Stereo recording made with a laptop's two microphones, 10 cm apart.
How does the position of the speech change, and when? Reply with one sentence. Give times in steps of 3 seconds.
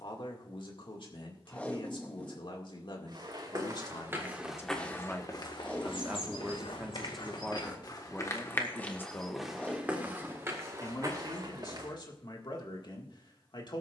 In this clip you hear the speech on the left from 0 s, in the centre from 6 s and on the left from 9 s.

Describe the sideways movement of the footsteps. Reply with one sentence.
You can hear the footsteps go left and come back.